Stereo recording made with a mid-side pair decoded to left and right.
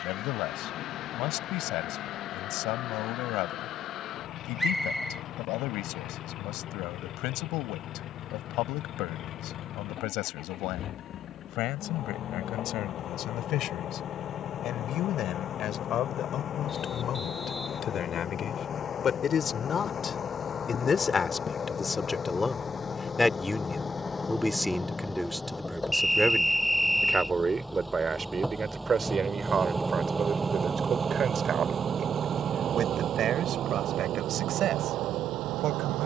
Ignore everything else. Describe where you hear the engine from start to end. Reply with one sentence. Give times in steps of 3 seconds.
You can hear the engine on the left from 0 s, in the centre from 24 s and on the right from 30 s.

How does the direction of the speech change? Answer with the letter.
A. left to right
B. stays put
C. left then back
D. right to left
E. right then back
A.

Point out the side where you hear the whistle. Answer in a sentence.
You can hear the whistle in the centre.